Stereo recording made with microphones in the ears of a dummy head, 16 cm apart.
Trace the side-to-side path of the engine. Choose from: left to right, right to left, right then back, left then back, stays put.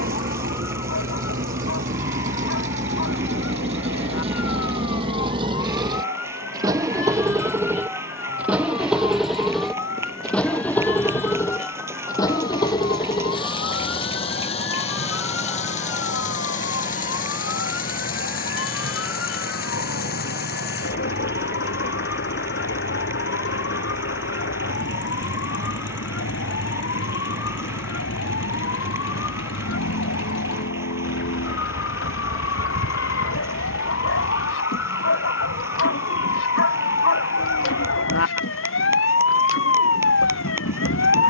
right to left.